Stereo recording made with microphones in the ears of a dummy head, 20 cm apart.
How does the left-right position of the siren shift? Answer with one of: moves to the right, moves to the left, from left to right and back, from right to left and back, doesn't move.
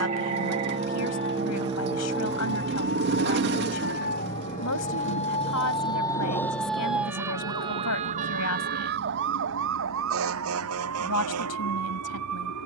moves to the right.